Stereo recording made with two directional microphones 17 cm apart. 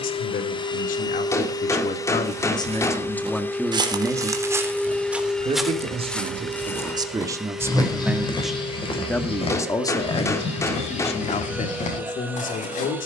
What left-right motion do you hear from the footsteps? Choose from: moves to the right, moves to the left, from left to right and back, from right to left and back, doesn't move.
moves to the left.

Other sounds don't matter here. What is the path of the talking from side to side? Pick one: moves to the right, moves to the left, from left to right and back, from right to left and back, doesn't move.
from left to right and back.